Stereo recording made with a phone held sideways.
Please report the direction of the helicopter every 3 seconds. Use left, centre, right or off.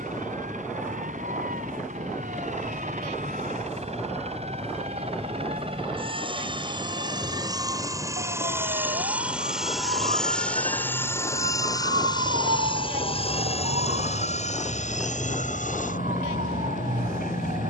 right, right, right, centre, left, left.